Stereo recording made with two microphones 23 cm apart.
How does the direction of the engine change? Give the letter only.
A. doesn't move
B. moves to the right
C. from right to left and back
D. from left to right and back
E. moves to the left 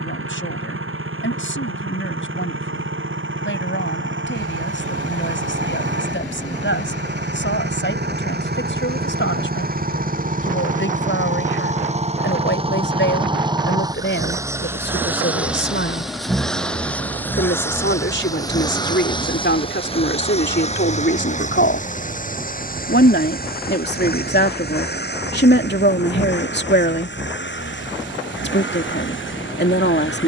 E.